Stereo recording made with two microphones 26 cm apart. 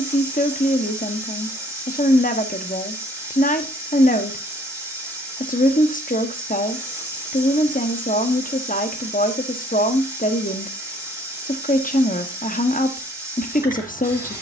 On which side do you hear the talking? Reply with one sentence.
You can hear the talking on the left.